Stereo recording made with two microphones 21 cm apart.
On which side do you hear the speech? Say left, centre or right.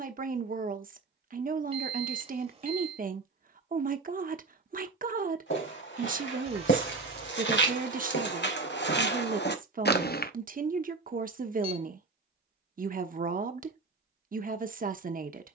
right.